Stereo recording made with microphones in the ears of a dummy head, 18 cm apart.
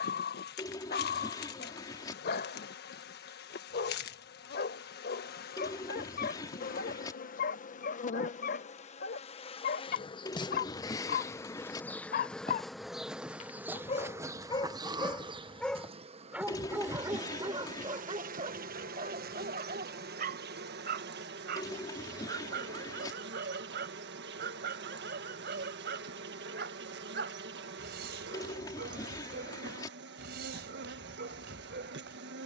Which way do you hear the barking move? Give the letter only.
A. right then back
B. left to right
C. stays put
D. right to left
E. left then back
B.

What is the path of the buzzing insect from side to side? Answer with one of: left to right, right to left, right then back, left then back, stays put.
left to right.